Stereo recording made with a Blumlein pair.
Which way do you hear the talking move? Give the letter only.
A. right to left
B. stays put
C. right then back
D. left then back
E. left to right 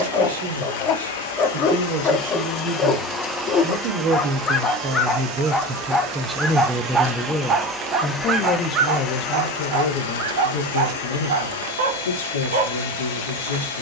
A.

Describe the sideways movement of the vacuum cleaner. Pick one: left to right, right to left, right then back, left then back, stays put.
right then back.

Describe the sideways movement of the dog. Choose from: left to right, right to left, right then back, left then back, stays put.
left to right.